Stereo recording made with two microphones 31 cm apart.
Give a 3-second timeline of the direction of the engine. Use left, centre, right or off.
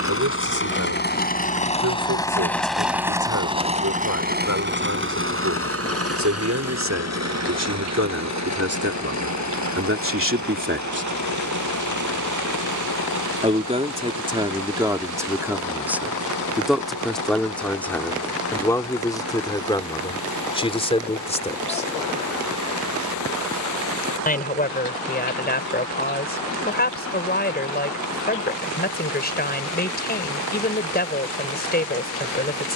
left, right, right, right, right, right, right, right, right, right, right.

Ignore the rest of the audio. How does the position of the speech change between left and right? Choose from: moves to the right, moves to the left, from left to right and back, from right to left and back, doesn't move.
moves to the left.